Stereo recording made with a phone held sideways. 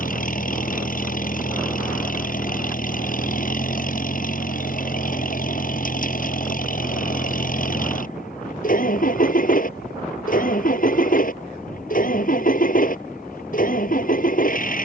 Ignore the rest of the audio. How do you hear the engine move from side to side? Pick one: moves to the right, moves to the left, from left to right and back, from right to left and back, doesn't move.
doesn't move.